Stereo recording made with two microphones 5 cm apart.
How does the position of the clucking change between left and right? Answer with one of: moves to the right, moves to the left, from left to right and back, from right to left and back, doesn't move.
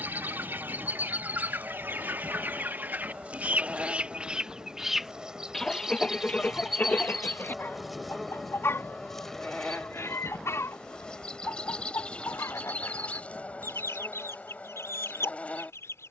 moves to the left.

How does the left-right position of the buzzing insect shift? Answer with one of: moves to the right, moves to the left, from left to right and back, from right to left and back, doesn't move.
moves to the left.